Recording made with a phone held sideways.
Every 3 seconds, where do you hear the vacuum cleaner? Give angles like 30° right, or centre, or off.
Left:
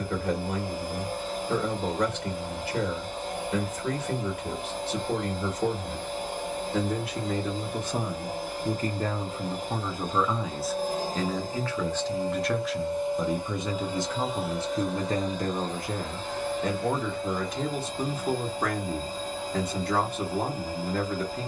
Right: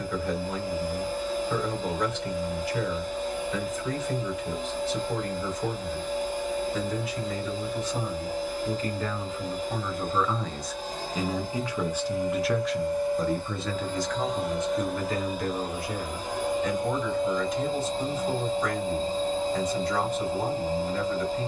60° left, 60° left, 60° left, 50° left, 20° left, 20° right, 30° right.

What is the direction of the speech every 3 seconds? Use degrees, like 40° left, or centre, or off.
60° left, 60° left, 50° left, 10° left, 10° left, 50° left, 60° left.